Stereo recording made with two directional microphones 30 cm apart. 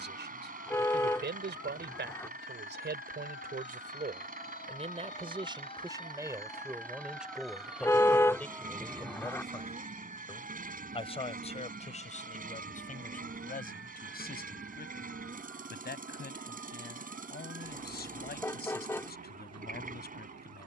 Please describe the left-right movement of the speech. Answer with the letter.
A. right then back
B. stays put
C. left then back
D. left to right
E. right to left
E.